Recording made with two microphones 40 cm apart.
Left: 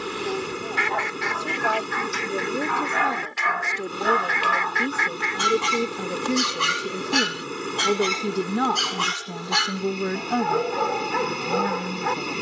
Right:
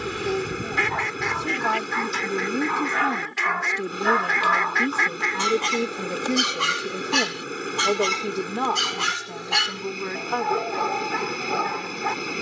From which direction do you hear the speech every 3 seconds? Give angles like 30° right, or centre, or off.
30° right, 20° right, 20° left, 50° left.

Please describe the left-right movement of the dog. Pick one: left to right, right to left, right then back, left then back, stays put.
left to right.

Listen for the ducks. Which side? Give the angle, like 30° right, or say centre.
60° right.